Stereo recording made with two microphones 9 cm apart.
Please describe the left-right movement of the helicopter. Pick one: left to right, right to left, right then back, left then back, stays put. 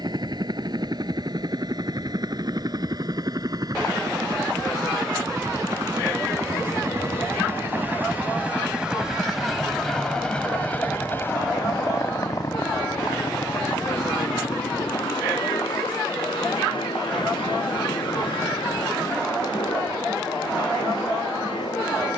right to left.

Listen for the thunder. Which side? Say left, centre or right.
left.